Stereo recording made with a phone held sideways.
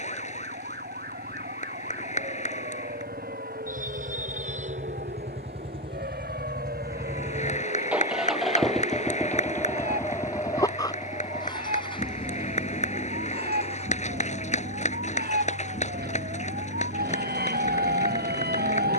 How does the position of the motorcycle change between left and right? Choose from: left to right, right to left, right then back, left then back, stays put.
right to left.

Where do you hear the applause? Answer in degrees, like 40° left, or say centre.
50° left.